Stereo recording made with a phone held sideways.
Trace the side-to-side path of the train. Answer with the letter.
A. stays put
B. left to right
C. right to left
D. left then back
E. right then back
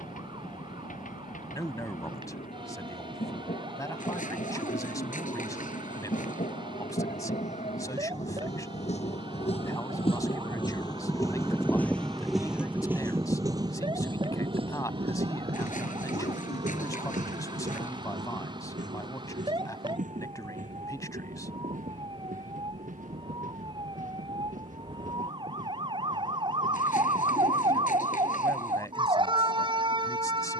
B.